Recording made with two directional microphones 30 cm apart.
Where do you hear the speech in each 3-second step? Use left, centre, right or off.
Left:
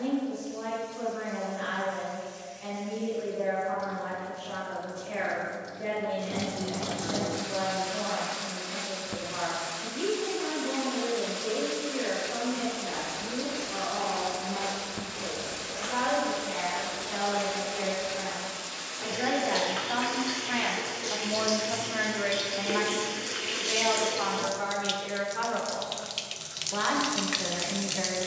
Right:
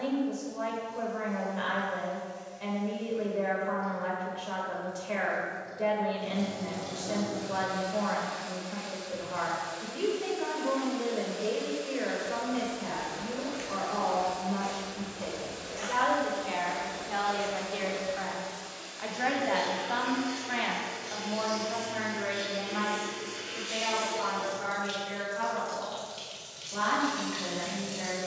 right, right, right, right, right, right, centre, left, left, left.